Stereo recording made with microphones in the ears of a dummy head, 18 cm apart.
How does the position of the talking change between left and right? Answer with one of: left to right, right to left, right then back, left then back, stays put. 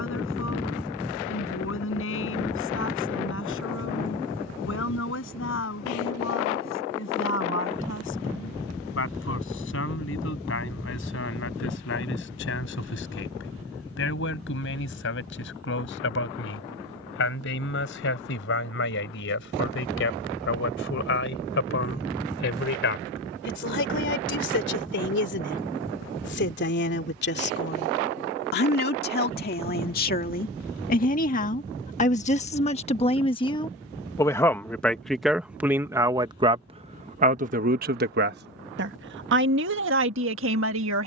left to right.